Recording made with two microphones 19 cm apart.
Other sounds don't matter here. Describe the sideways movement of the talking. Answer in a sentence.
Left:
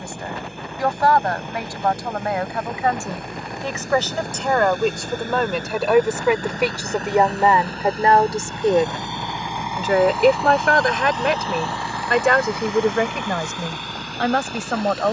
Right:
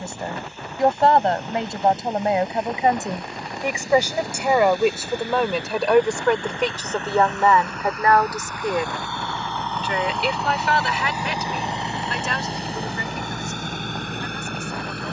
You can hear the talking travel towards the left.